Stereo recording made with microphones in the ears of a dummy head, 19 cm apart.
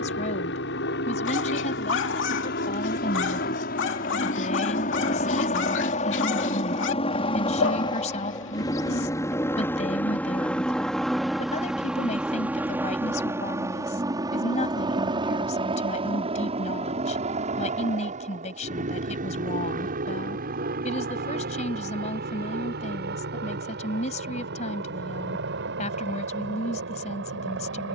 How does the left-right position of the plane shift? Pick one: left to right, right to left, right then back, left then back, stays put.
left to right.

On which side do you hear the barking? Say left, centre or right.
left.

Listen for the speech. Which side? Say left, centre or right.
left.